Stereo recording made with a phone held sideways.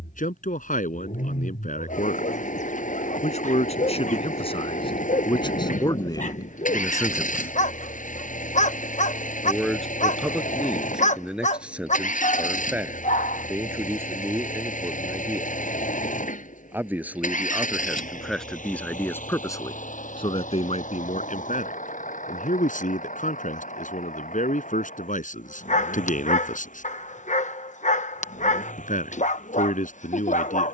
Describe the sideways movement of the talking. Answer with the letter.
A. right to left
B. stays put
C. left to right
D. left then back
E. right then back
E.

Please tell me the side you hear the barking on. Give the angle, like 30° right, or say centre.
60° left.